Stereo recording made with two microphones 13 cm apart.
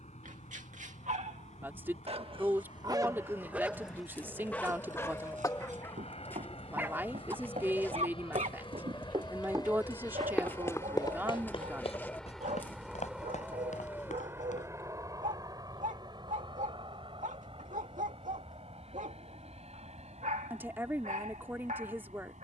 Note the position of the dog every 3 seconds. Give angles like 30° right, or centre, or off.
60° right, 10° left, 50° right, 80° right, 80° right, 80° right, 80° right, 80° right.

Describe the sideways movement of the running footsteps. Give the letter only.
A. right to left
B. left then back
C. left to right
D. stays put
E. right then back
A.